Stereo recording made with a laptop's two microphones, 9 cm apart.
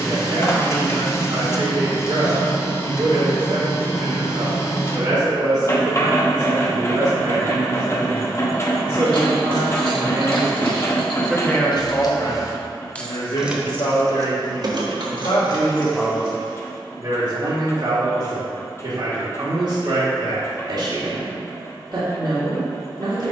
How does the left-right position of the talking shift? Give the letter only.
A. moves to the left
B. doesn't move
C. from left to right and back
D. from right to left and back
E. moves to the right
D.